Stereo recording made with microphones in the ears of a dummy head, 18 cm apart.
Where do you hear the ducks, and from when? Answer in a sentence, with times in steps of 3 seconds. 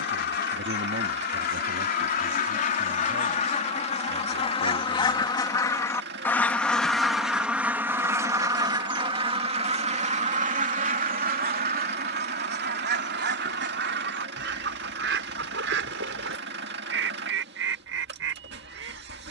You can hear the ducks on the left from 0 s, in the centre from 6 s and on the right from 9 s.